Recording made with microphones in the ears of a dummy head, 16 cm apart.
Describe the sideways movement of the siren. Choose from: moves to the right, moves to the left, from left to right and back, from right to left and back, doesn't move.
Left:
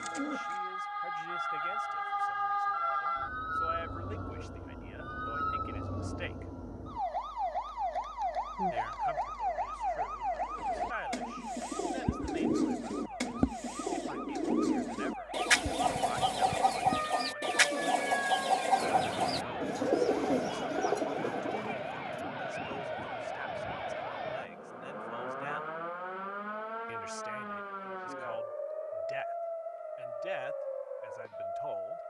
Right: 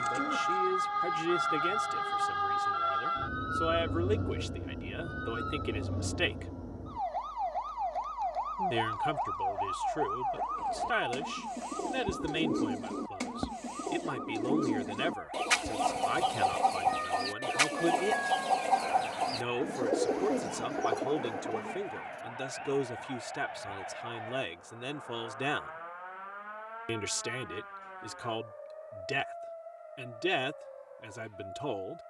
moves to the left.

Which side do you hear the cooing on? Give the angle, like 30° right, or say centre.
10° left.